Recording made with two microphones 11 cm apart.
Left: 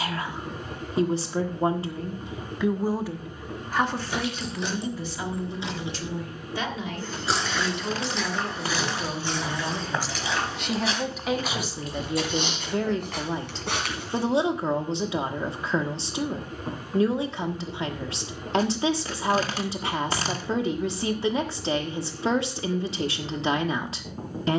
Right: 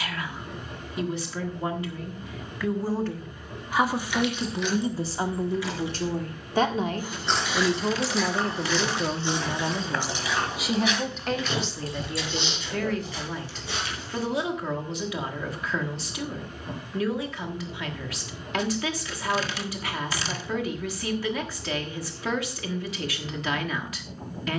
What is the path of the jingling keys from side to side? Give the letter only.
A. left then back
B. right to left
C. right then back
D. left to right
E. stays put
D.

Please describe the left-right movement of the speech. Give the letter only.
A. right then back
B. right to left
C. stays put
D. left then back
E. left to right
A.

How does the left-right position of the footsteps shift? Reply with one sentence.
You can hear the footsteps go from the right side to the left.